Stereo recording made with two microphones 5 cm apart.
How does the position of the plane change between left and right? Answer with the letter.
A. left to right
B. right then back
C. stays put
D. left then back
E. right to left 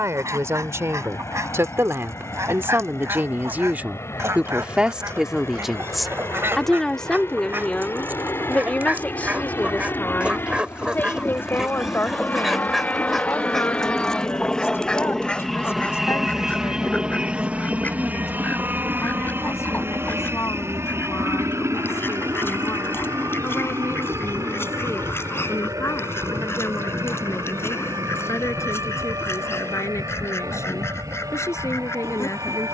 A.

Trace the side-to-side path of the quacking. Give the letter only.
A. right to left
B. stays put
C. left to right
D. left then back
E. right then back
A.